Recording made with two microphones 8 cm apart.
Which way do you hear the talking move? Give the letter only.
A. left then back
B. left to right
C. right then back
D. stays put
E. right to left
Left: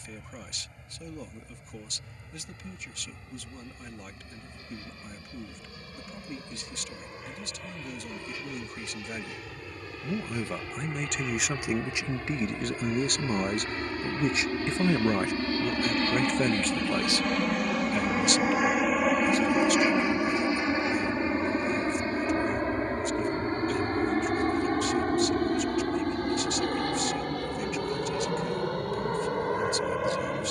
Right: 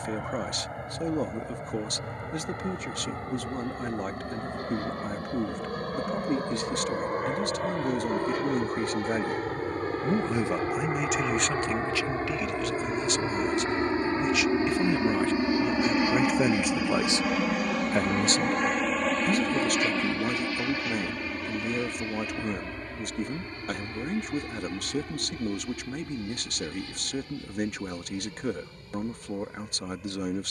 A.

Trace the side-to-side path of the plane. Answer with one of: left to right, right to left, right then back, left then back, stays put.
right to left.